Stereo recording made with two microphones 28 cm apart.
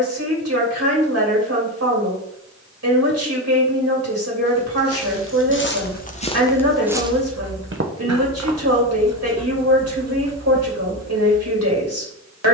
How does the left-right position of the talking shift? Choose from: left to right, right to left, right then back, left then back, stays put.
stays put.